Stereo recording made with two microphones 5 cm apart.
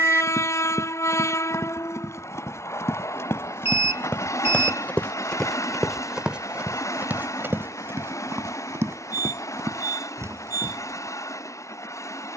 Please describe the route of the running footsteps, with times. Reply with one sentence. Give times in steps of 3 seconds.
You can hear the running footsteps on the left from 0 s and on the right from 6 s.